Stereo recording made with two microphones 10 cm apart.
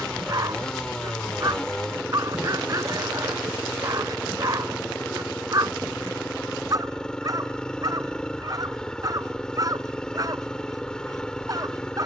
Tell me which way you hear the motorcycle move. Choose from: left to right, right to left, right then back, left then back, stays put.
stays put.